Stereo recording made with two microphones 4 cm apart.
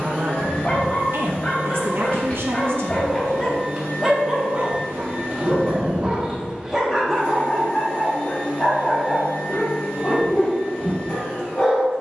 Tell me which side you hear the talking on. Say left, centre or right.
right.